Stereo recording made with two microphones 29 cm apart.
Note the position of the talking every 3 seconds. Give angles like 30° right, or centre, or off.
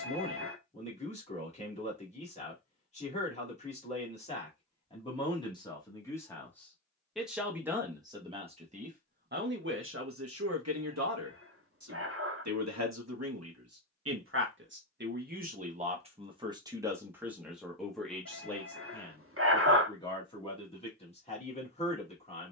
20° left, 20° left, 10° right, 50° right, 60° right, 20° right, 10° left, 20° left.